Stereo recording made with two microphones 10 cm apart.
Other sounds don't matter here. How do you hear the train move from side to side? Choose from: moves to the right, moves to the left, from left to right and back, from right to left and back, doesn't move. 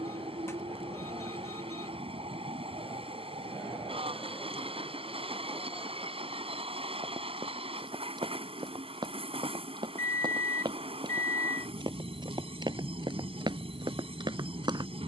doesn't move.